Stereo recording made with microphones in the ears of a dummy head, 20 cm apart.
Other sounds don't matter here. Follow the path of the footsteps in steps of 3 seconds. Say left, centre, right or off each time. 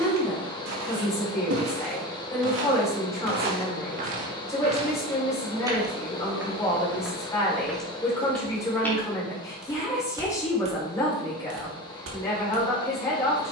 right, right, centre, right, right.